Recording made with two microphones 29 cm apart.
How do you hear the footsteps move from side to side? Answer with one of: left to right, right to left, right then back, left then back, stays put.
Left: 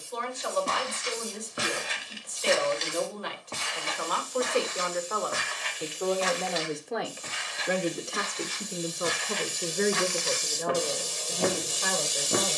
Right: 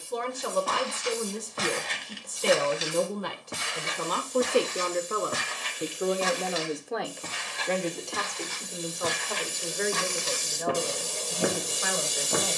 right then back.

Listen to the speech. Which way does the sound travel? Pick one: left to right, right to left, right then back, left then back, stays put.
right to left.